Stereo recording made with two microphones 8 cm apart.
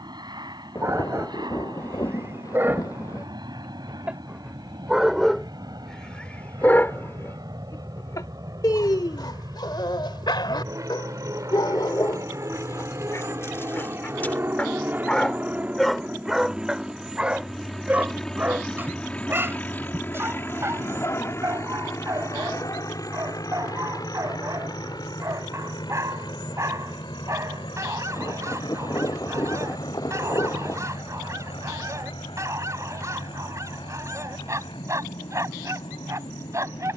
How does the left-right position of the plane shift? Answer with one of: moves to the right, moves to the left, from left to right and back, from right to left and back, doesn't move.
moves to the left.